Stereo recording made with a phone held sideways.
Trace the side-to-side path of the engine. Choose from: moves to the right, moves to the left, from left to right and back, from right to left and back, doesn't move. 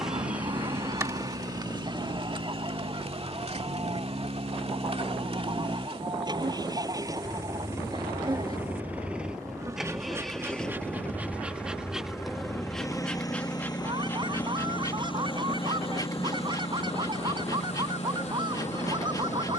moves to the left.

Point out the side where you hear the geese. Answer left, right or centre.
right.